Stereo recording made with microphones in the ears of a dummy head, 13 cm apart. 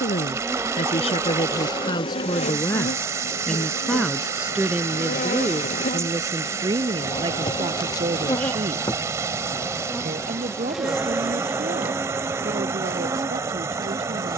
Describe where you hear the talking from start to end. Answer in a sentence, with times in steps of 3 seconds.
You can hear the talking on the left from 0 s, in the centre from 3 s and on the right from 6 s.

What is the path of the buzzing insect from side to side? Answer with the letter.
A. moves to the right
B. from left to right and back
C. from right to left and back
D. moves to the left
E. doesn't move
C.